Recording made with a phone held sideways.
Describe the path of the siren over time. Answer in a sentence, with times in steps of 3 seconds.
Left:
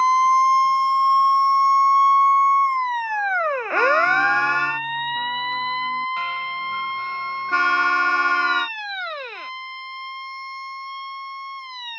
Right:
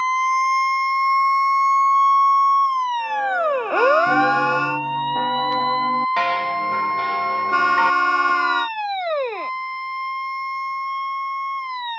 In this clip you hear the siren in the centre from 0 s and on the right from 3 s.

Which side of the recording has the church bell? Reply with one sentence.
In this clip you hear the church bell on the right.